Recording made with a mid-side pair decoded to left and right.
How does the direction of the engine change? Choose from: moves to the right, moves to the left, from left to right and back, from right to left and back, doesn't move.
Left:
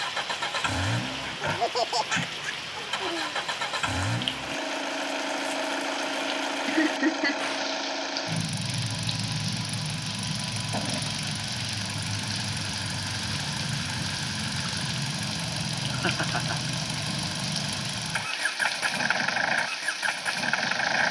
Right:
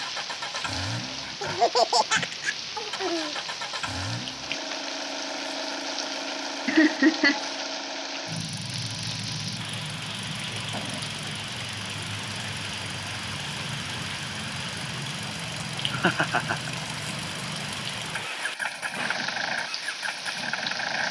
doesn't move.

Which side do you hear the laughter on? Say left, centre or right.
right.